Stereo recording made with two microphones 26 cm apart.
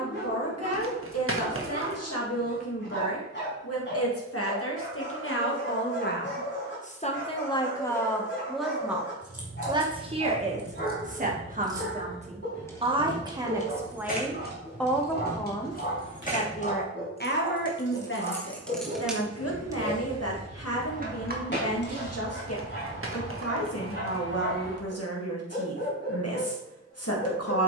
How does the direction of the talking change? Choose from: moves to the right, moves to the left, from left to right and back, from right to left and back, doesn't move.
from left to right and back.